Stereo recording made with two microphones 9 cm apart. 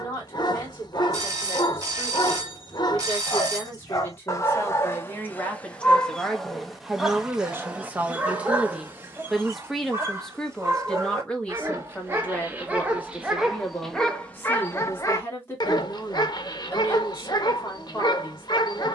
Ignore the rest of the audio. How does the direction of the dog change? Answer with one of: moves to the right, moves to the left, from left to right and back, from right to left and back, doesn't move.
from left to right and back.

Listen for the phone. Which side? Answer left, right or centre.
right.